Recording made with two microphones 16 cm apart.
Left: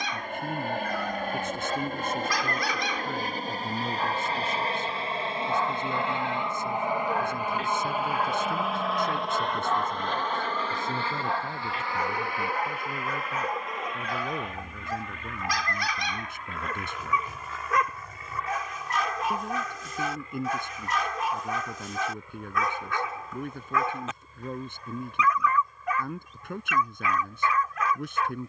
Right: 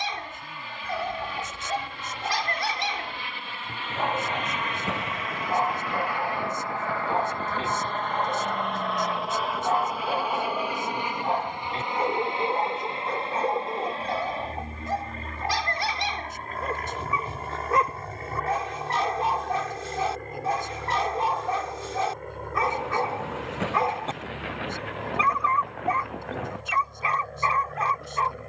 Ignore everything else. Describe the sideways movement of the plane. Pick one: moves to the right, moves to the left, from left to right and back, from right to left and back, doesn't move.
moves to the right.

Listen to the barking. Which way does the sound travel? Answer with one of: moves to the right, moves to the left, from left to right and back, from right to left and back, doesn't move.
doesn't move.